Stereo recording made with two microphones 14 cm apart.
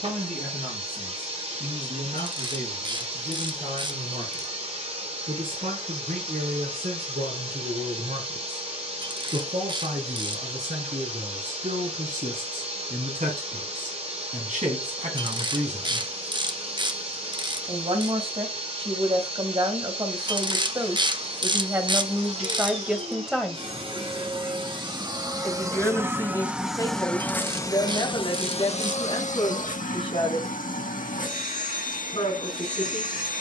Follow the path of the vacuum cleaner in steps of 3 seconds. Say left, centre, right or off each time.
right, right, right, right, right, right, right, right, right, left, left.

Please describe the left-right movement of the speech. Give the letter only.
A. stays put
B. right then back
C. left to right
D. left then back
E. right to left
E.